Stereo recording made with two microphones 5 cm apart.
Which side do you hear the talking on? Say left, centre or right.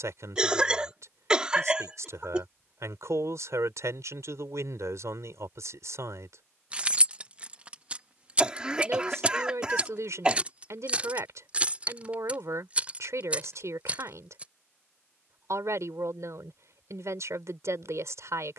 right.